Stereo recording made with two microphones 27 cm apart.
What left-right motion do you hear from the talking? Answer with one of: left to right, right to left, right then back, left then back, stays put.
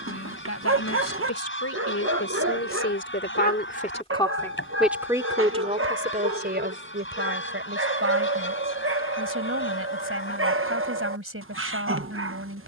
left to right.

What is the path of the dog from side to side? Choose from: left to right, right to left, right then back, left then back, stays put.
stays put.